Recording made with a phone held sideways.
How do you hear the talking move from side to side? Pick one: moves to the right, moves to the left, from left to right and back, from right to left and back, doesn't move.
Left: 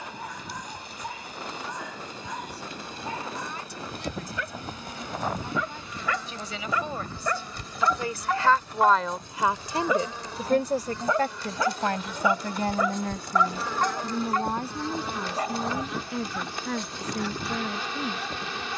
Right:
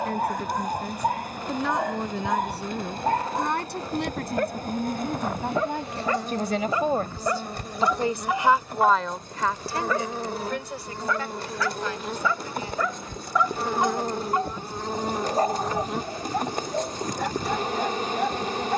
moves to the left.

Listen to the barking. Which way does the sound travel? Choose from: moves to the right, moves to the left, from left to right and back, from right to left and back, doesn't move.
from right to left and back.